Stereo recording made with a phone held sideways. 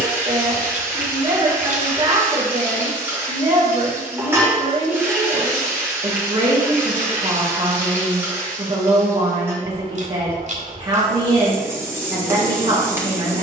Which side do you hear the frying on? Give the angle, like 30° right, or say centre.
20° right.